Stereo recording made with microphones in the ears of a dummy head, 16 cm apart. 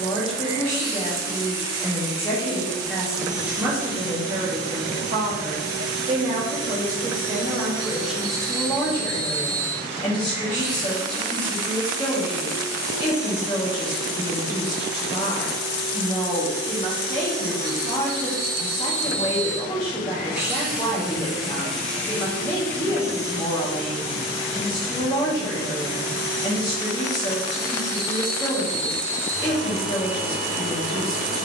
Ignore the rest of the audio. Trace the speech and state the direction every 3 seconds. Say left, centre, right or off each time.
left, right, centre, left, left, left, left, left, left, left, left.